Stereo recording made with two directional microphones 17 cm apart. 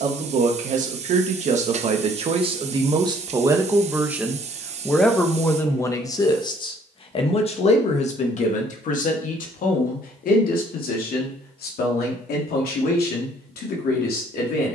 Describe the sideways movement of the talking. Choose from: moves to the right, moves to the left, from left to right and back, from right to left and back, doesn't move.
moves to the left.